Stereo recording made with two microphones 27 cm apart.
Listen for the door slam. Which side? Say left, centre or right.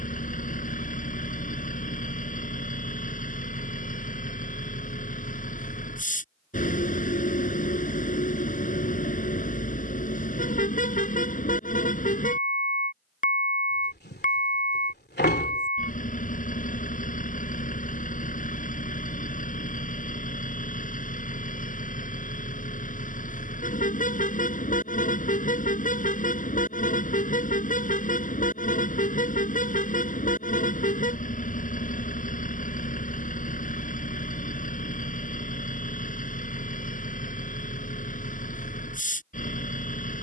left.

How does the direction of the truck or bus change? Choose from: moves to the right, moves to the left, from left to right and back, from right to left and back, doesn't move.
doesn't move.